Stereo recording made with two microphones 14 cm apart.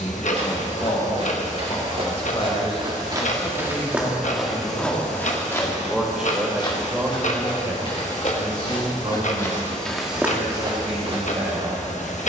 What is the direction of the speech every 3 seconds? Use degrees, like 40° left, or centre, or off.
50° left, 20° left, 20° right, 50° right.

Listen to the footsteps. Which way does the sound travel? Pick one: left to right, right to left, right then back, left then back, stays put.
left then back.